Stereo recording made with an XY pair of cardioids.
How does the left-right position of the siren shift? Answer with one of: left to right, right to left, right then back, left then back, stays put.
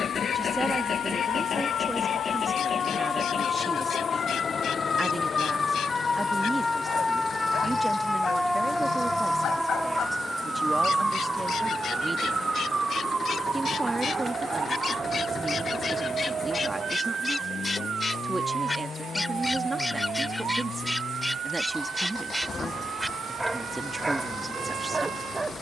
left to right.